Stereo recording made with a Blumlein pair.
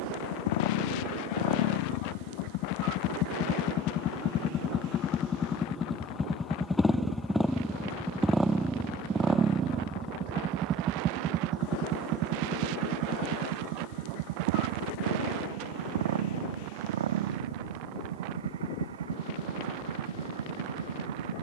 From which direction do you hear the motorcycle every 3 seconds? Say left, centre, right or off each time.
left, left, centre, right, right, right, right.